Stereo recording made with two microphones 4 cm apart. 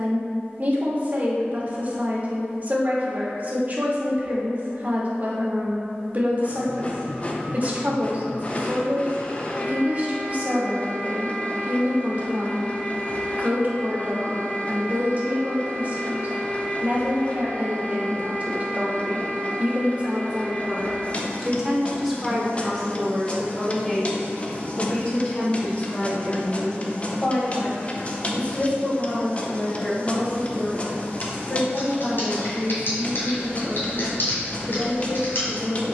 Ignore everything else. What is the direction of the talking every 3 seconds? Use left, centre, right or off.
right, right, right, right, right, right, right, centre, left, left, left, left.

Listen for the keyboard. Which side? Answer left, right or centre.
left.